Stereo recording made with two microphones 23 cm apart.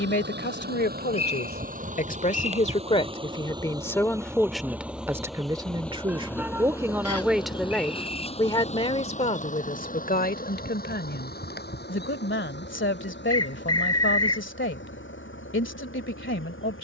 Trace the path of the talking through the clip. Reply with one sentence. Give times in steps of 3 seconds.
You can hear the talking on the left from 0 s, in the centre from 3 s and on the left from 9 s.